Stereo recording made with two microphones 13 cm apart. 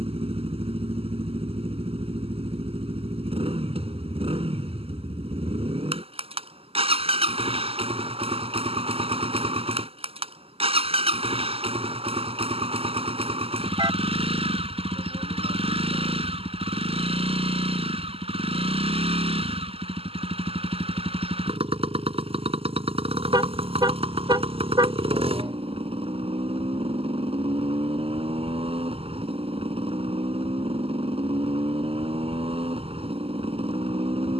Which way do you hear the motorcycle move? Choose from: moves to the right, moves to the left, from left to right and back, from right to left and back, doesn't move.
doesn't move.